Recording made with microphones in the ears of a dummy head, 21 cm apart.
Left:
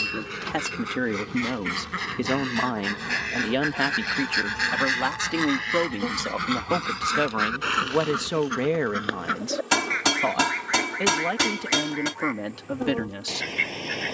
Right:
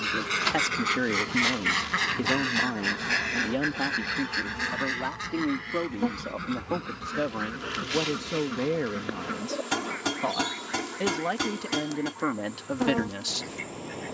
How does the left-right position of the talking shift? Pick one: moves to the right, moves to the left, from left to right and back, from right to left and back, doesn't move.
from right to left and back.